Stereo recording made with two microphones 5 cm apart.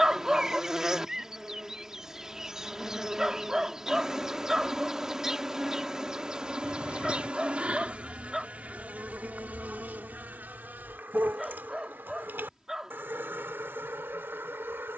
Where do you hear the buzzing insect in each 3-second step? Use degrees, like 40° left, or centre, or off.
10° right, 10° right, 20° right, 40° right, 50° right.